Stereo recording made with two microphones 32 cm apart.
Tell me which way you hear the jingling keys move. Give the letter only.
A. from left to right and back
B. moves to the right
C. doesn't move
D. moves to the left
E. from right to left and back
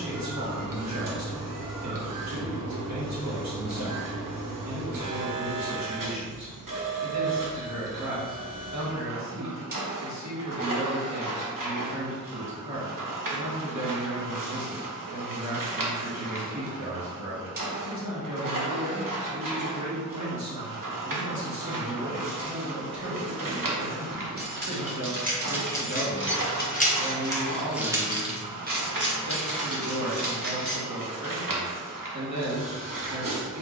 E.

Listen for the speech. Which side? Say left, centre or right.
right.